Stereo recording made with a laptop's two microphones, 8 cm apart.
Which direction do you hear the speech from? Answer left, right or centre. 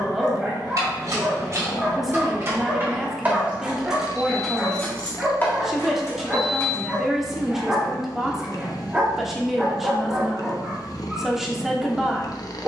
centre.